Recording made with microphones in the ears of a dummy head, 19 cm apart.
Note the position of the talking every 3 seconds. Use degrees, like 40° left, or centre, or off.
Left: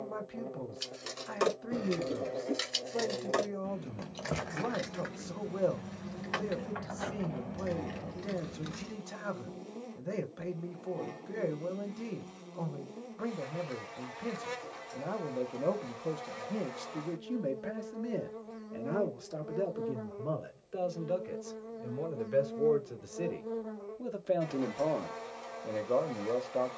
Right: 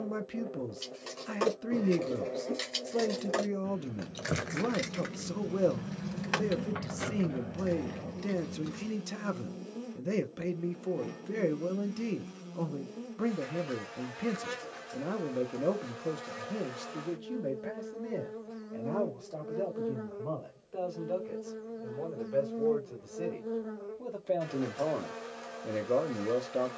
40° right, 40° right, 40° right, 40° right, 40° right, 10° right, 20° left, 20° left, 10° right.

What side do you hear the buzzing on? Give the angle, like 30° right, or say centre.
10° right.